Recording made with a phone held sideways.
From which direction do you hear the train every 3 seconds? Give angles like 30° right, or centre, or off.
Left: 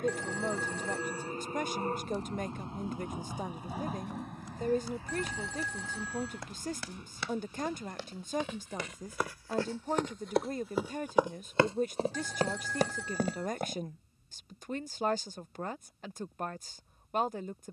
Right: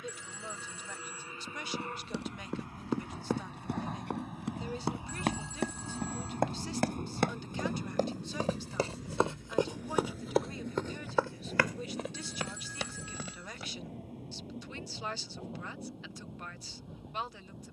40° left, 10° right, 50° right, 70° right, 80° right, 80° right.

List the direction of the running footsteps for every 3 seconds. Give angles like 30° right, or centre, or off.
80° right, 70° right, 50° right, centre, 40° left, off.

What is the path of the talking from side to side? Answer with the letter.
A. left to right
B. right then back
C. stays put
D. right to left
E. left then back
C.